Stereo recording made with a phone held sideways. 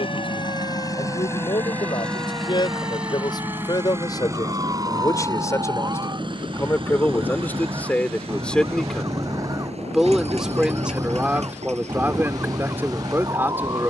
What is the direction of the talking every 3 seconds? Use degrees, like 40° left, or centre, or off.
30° left, 20° left, 10° left, 10° right, 10° right.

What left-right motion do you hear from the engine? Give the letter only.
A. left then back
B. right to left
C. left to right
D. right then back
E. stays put
C.